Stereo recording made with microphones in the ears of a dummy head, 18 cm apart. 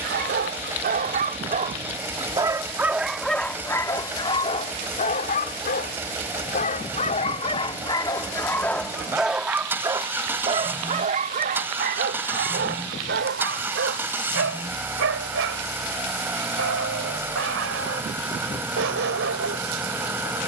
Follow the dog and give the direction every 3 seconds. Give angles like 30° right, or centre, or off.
40° right, 20° left, 20° left, 30° right, 60° right, 70° right, 70° right.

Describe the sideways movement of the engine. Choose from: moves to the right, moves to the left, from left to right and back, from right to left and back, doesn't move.
doesn't move.